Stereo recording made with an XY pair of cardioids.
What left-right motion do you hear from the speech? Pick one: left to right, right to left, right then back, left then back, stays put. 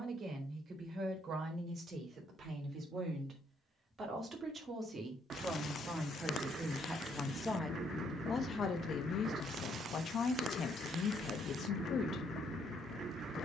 right to left.